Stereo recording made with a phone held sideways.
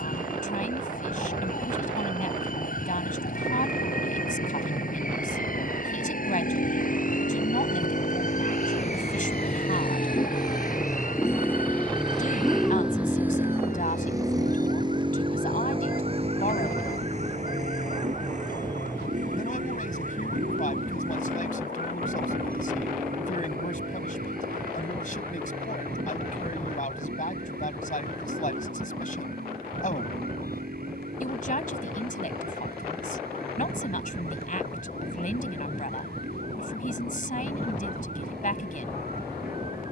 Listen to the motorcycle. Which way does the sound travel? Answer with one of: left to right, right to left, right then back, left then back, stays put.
left to right.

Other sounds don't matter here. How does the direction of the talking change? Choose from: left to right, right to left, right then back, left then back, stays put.
stays put.